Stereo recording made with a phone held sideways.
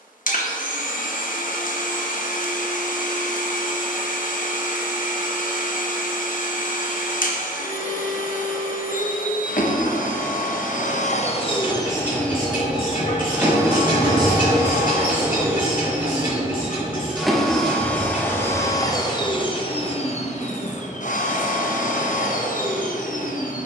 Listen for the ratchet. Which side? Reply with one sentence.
In this clip you hear the ratchet on the left.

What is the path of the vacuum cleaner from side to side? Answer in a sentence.
In this clip you hear the vacuum cleaner go right and come back.